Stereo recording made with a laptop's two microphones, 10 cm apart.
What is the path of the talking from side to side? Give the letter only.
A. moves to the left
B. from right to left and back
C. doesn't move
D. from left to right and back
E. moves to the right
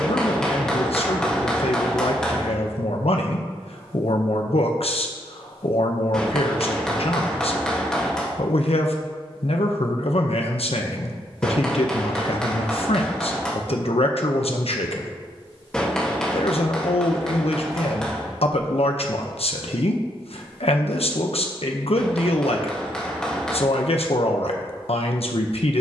C.